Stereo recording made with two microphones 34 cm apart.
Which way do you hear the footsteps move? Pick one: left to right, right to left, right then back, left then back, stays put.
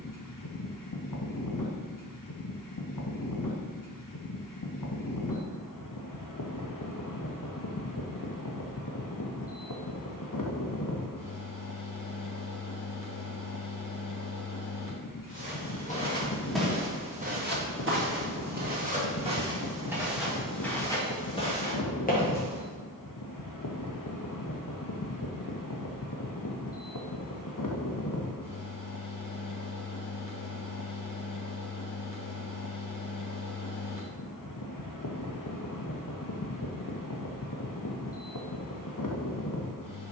right then back.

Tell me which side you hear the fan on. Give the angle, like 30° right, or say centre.
70° left.